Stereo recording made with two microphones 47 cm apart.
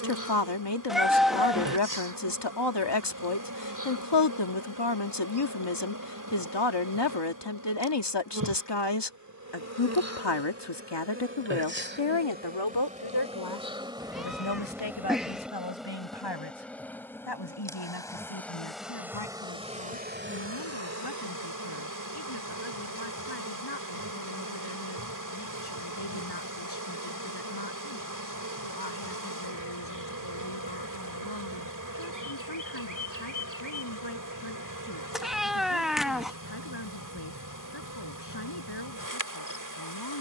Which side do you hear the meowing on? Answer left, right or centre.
centre.